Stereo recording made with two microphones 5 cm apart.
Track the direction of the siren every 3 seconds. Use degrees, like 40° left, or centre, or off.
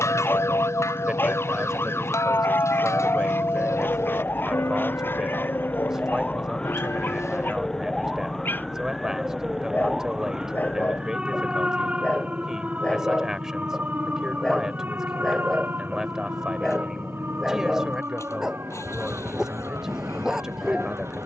50° left, 30° left, 10° left, 10° right, 30° right, 40° right, 50° right.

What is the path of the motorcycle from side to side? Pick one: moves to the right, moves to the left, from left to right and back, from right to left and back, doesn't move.
doesn't move.